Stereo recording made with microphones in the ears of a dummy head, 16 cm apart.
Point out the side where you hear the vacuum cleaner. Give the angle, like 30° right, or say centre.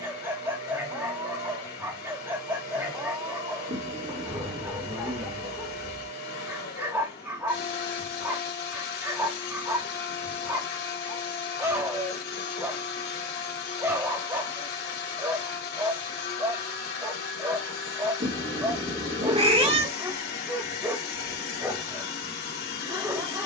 50° left.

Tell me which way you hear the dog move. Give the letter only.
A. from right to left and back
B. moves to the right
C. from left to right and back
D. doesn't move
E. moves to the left
D.